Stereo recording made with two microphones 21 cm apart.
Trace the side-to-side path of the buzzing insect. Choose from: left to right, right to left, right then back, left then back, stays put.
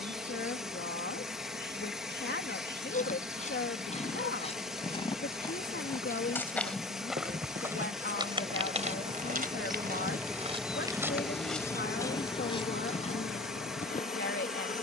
right to left.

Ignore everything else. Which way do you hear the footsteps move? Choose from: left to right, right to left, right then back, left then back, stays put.
right then back.